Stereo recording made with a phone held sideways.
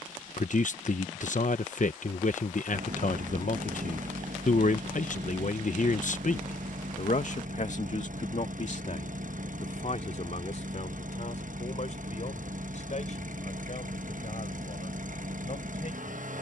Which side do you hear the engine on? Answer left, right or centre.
right.